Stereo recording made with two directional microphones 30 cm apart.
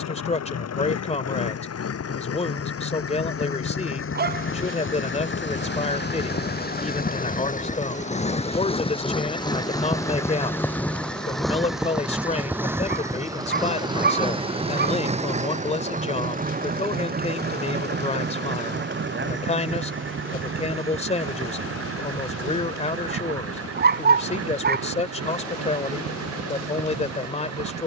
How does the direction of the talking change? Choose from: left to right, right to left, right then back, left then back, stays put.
stays put.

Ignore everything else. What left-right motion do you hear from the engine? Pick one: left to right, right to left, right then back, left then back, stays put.
left to right.